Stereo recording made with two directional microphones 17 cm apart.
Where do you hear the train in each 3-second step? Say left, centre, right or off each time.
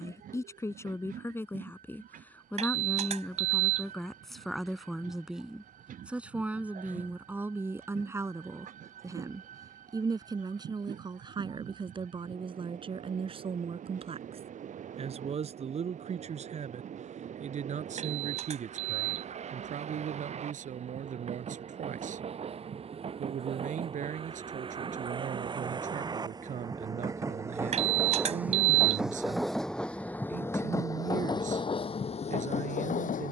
right, right, right, right, right, right, right, right, right, centre, left.